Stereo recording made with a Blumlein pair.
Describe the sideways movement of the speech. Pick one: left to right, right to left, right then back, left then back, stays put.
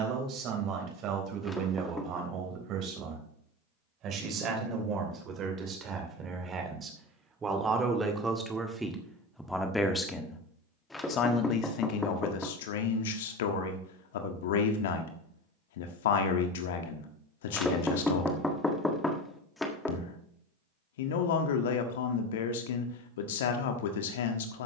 right to left.